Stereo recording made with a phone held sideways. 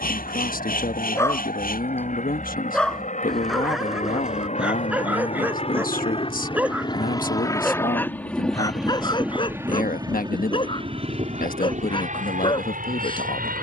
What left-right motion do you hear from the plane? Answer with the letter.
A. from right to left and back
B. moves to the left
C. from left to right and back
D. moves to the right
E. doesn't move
D.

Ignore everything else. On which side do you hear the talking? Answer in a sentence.
You can hear the talking on the left.